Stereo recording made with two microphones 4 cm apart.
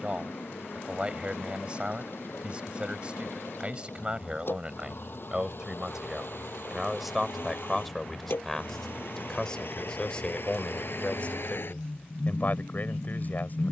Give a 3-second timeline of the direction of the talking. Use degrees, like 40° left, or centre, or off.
20° right, 20° right, centre, 30° left, 40° left.